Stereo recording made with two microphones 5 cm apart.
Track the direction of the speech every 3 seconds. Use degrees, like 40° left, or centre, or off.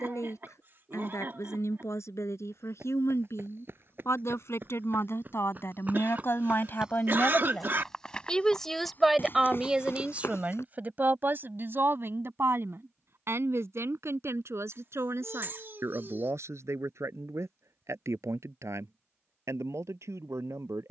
70° left, 60° left, 30° left, 30° right, 60° right, 70° right, 80° right.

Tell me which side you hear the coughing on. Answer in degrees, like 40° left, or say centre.
50° right.